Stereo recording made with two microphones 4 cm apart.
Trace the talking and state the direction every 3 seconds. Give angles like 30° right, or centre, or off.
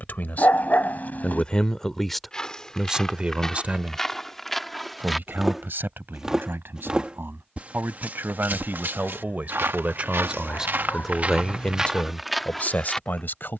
20° left, 50° right, 60° right, 20° right, 50° left.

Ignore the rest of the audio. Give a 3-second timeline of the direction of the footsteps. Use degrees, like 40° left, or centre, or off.
20° left, 10° left, 40° right, 50° right, centre.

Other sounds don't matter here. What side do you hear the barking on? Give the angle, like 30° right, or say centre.
40° left.